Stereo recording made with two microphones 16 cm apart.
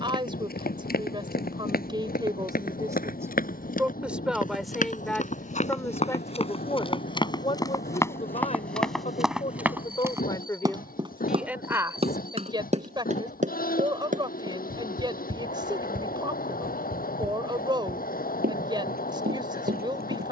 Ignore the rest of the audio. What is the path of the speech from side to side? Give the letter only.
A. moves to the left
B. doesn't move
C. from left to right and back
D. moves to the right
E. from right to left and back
E.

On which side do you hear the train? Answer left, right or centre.
left.